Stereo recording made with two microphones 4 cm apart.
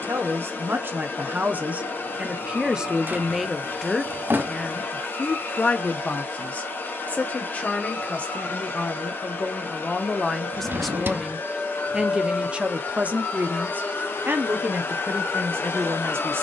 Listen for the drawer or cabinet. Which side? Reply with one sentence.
In this clip you hear the drawer or cabinet on the right.